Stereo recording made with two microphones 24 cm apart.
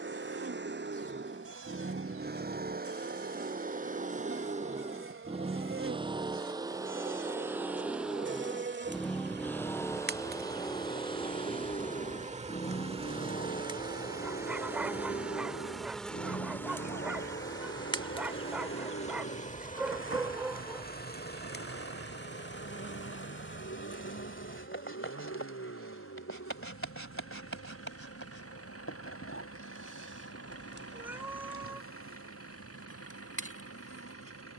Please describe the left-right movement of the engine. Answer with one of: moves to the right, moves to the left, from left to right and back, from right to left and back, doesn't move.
moves to the left.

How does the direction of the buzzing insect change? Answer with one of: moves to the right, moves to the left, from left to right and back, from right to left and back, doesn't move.
moves to the left.